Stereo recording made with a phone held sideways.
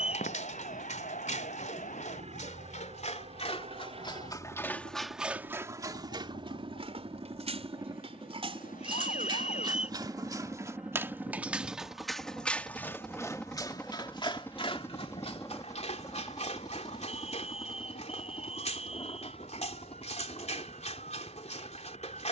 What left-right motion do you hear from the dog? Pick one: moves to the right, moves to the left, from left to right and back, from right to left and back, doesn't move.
from left to right and back.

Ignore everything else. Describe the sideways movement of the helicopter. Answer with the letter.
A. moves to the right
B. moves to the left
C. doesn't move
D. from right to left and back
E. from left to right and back
B.